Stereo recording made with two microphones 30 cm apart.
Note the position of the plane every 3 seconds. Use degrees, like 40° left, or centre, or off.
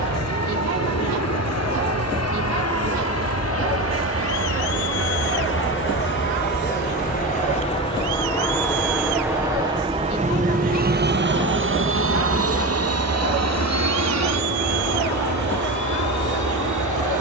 70° left, 50° left, 20° left, 20° right, 50° right, 70° right.